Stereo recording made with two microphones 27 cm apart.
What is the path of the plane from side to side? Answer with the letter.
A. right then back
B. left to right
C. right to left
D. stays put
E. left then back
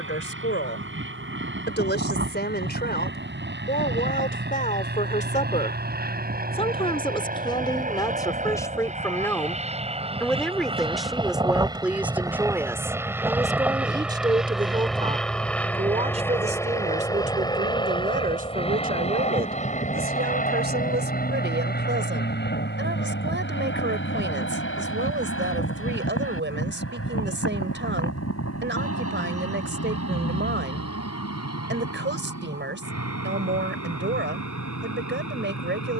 C.